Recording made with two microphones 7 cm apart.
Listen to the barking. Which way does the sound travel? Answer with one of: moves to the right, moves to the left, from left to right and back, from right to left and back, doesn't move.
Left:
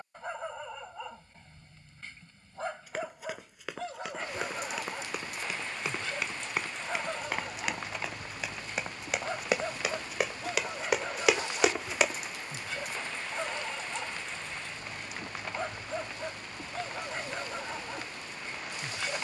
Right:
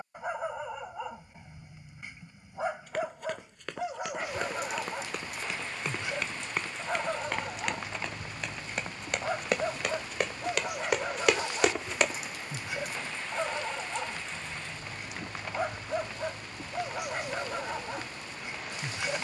doesn't move.